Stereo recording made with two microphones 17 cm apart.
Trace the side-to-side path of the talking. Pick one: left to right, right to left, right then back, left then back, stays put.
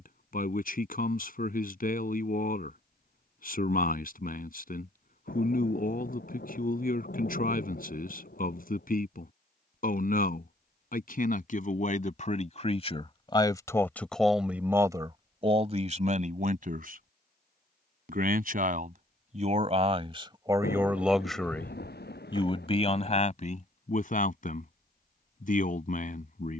right then back.